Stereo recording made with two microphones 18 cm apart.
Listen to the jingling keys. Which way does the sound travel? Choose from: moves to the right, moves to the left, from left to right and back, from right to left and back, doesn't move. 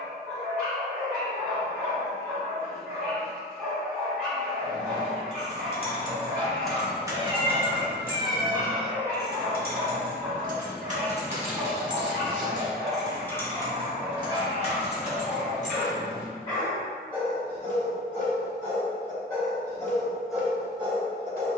from left to right and back.